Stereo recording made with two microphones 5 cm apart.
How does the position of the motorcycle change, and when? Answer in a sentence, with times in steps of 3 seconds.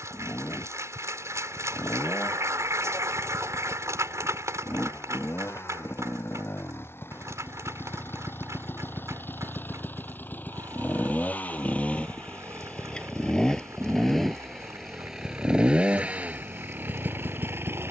You can hear the motorcycle on the left from 0 s, in the centre from 12 s and on the right from 15 s.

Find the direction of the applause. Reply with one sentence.
In this clip you hear the applause on the right.